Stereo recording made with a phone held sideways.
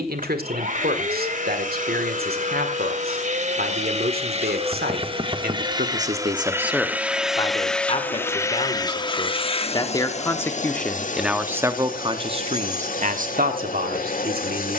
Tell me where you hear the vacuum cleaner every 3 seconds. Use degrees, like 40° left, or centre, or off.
60° right, 40° right, centre, 50° left, 60° left.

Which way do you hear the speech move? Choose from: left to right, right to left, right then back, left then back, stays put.
left then back.